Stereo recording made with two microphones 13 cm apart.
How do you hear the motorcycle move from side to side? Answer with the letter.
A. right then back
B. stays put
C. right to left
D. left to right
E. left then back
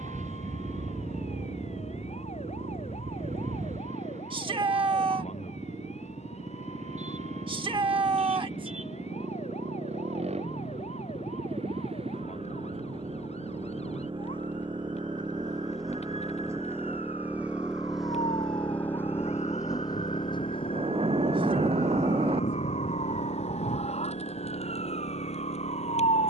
C.